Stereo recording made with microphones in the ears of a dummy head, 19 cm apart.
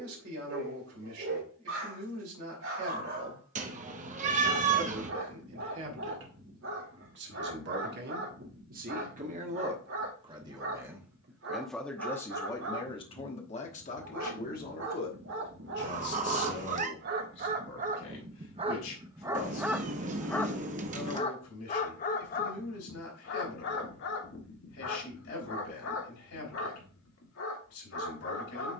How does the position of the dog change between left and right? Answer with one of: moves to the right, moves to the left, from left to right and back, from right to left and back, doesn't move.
moves to the left.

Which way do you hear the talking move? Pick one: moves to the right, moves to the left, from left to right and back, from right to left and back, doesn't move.
moves to the left.